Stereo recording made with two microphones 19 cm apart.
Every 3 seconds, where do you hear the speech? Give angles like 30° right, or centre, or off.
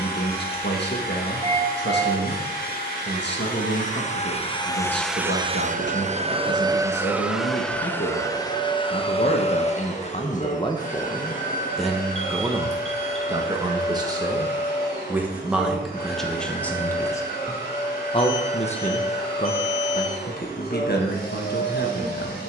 60° left, 60° left, 60° left, 30° left, 20° right, centre, 40° left, 60° left.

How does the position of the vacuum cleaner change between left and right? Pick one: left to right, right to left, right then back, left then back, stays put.
right then back.